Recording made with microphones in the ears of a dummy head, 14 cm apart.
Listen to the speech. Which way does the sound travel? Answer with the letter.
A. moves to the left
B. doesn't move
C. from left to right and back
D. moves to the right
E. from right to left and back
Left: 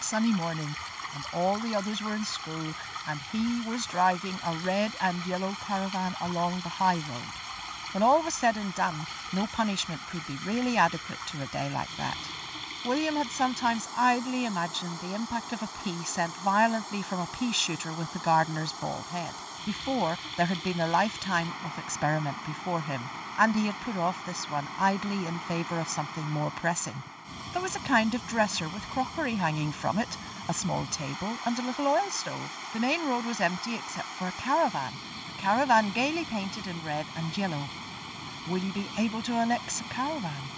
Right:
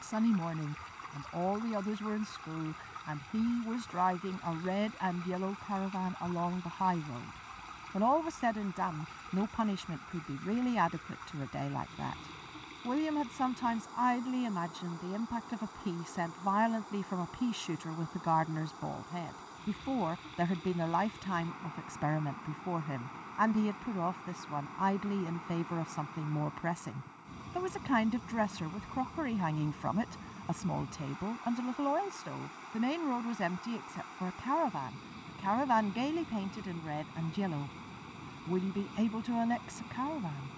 B.